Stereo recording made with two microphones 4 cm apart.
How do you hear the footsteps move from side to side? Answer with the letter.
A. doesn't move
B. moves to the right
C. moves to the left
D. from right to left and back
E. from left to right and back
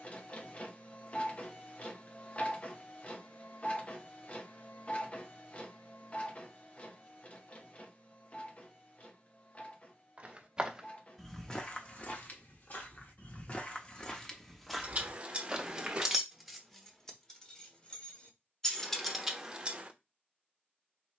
D.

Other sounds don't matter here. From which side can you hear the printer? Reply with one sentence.
In this clip you hear the printer on the left.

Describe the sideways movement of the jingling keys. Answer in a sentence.
You can hear the jingling keys move from right to left and back again.